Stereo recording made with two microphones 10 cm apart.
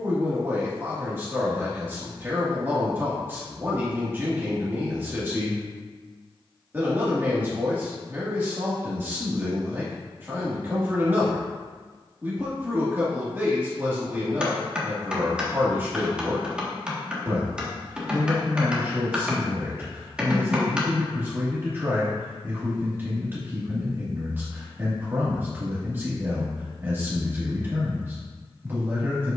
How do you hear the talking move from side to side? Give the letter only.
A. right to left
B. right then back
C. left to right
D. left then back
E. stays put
E.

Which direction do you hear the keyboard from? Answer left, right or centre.
centre.